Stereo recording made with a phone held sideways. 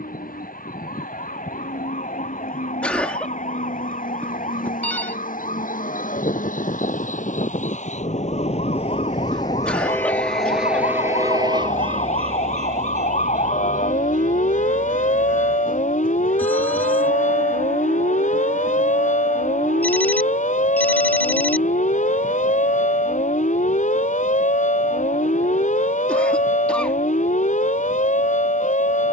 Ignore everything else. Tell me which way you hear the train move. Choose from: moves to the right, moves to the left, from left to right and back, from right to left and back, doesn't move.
moves to the right.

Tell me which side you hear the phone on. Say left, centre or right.
centre.